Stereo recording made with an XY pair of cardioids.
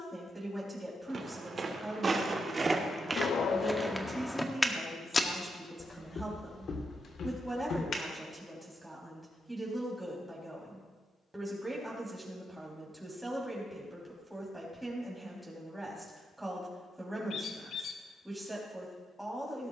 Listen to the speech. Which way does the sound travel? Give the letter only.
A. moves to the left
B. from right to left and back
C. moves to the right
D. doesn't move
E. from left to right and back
D.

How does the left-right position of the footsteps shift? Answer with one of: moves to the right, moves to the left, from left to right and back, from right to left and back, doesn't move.
moves to the left.